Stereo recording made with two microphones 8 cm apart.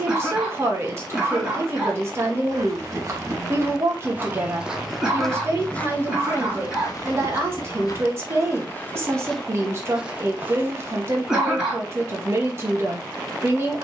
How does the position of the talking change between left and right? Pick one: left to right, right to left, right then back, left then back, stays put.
stays put.